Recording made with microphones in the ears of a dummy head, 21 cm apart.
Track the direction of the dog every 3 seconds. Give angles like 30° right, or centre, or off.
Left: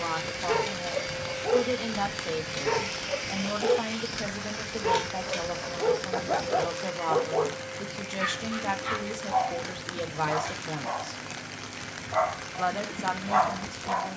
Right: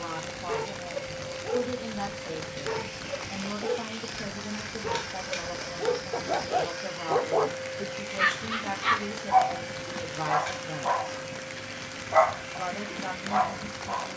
30° left, 20° left, 30° right, 70° right, centre.